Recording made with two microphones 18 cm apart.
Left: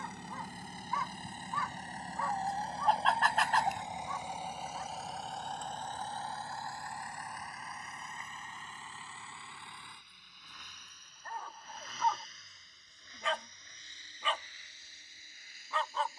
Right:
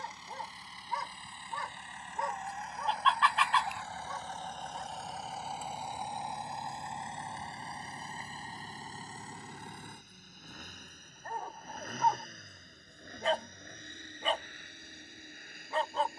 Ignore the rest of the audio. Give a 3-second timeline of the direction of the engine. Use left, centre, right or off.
left, centre, right, right, right, right.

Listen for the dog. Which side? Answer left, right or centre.
right.